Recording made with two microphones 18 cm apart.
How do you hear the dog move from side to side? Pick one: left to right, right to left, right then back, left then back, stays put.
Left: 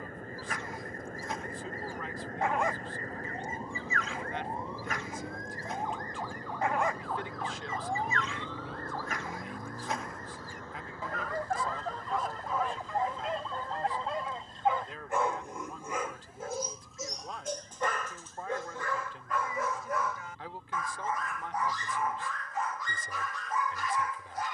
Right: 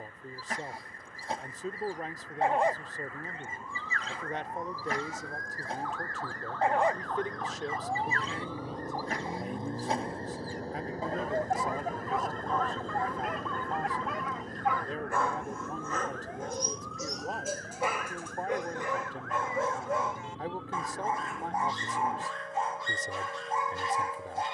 left then back.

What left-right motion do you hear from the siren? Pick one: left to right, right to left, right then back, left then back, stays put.
left to right.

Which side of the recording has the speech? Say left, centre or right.
right.